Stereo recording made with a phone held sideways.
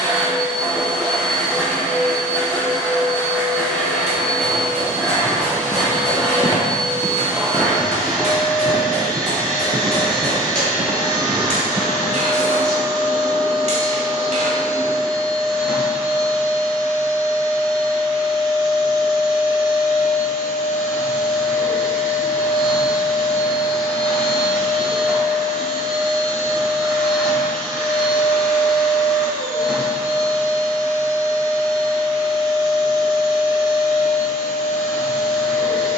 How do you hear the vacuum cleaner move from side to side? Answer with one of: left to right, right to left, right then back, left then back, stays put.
stays put.